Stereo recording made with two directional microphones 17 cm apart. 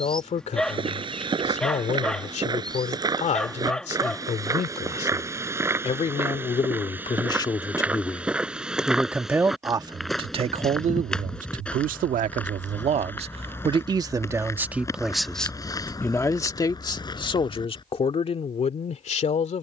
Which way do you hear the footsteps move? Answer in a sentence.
In this clip you hear the footsteps move from right to left.